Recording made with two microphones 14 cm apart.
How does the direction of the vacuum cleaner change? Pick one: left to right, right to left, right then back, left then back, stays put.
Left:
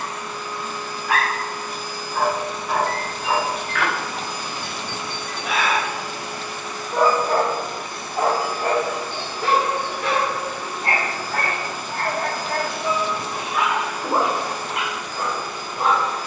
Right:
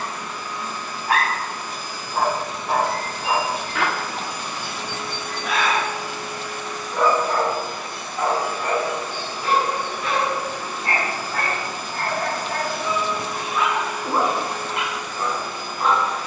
stays put.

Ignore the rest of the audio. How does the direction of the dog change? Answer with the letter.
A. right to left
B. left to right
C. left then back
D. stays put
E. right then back
A.